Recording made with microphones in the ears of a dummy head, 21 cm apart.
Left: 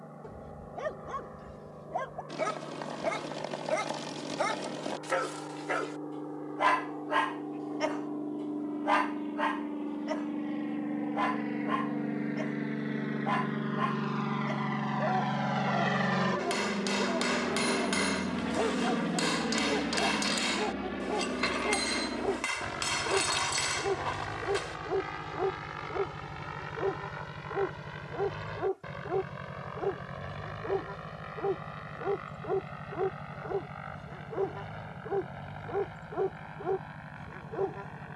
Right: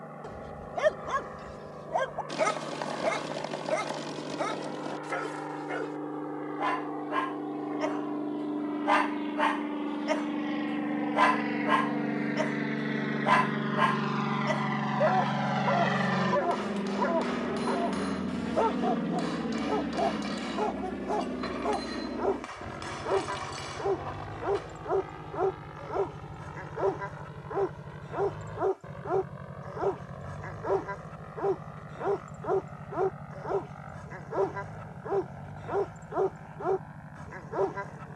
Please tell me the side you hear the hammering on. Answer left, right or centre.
left.